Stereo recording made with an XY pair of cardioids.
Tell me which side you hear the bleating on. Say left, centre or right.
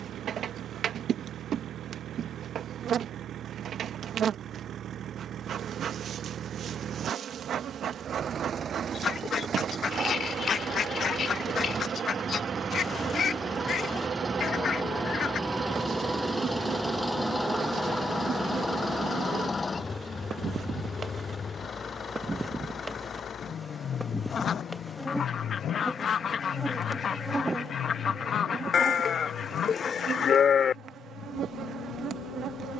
left.